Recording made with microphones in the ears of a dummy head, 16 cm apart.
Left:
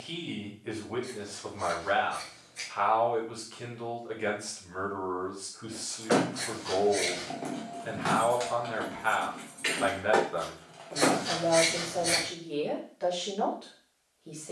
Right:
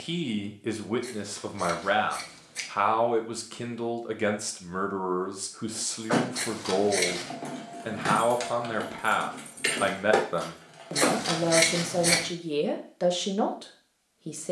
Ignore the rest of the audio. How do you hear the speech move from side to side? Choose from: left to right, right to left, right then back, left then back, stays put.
stays put.